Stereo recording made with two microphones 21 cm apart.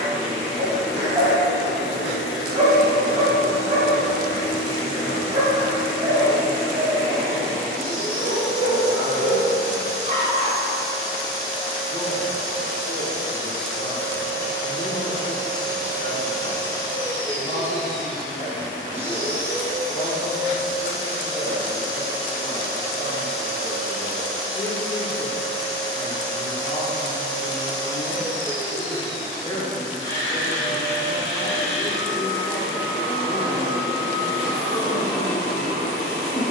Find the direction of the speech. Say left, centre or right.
left.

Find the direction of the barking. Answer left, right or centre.
right.